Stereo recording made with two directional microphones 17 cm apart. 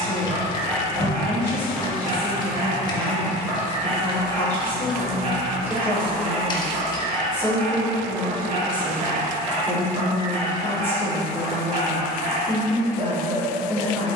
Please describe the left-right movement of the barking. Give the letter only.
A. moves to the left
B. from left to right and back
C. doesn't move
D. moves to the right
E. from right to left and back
C.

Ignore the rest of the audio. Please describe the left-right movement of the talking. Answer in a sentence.
You can hear the talking stay in one place.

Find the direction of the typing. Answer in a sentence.
You can hear the typing on the left.